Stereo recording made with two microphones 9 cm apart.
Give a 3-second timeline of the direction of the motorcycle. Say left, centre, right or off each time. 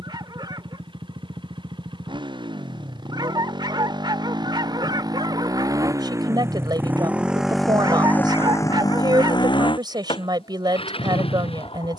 right, right, centre, left.